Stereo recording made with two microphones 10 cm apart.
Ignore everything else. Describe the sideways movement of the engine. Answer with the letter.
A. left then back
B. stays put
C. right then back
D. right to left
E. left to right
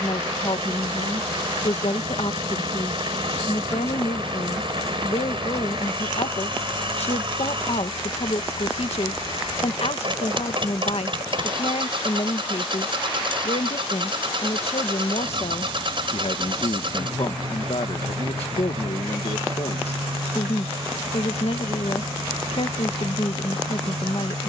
B.